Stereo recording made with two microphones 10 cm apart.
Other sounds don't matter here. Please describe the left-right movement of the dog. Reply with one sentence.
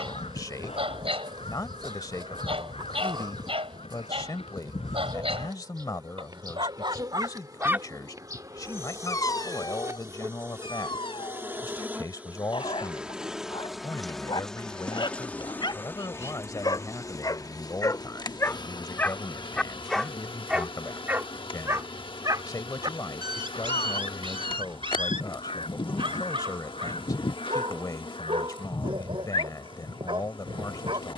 In this clip you hear the dog move from right to left and back again.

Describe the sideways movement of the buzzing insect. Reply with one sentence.
You can hear the buzzing insect go from the right side to the left.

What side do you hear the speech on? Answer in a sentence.
You can hear the speech on the left.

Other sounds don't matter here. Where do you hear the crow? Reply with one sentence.
In this clip you hear the crow on the left.